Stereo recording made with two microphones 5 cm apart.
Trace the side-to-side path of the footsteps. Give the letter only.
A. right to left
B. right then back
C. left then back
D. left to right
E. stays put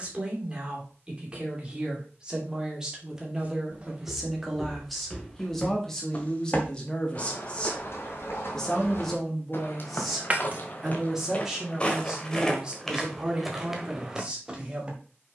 C.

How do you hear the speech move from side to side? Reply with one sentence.
In this clip you hear the speech move from right to left and back again.